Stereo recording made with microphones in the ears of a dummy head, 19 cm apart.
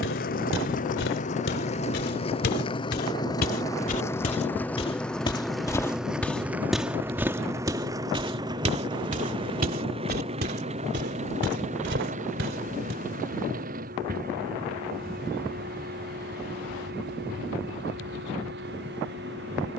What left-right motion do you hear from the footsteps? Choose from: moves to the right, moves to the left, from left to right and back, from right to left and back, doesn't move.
moves to the right.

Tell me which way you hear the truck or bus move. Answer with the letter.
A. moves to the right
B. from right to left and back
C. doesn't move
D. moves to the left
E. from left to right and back
A.